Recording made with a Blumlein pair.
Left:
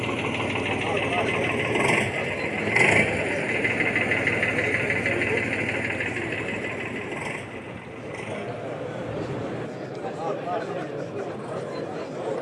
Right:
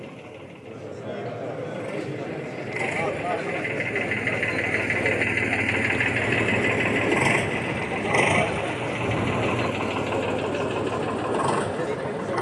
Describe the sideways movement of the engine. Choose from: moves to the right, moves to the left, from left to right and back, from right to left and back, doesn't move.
moves to the right.